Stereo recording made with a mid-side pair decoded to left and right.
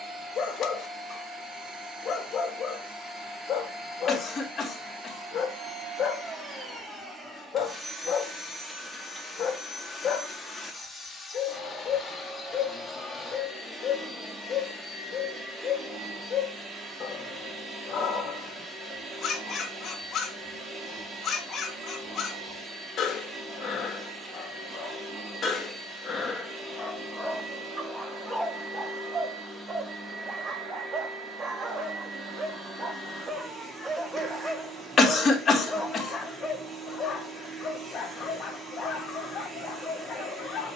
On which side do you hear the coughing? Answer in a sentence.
You can hear the coughing on the left.